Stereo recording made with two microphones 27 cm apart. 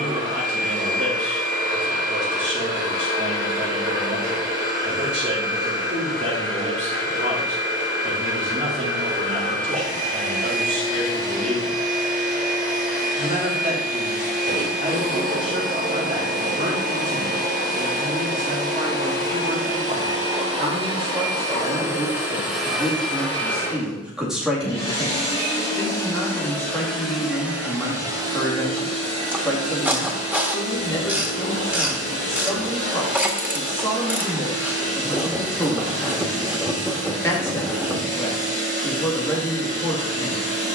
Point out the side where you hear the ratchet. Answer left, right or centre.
centre.